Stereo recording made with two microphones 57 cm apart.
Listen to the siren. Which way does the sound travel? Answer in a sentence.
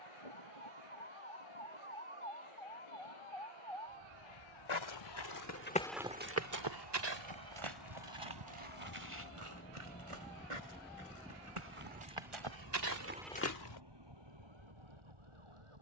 In this clip you hear the siren move from left to right.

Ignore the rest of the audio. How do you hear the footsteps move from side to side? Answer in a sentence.
In this clip you hear the footsteps go right and come back.